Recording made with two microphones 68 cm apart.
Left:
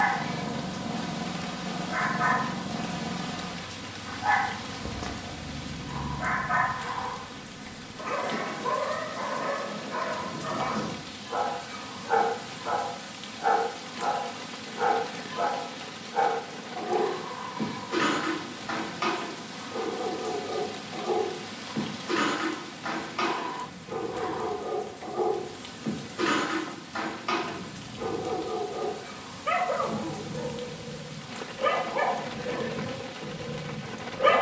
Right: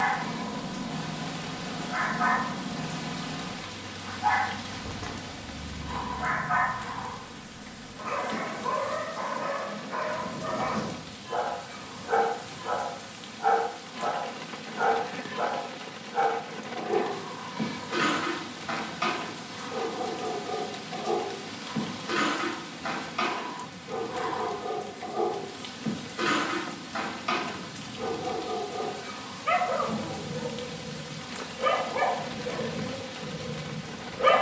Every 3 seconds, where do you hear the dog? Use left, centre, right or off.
left, left, left, left, centre, right, right, right, right, right, right, right.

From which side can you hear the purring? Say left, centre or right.
left.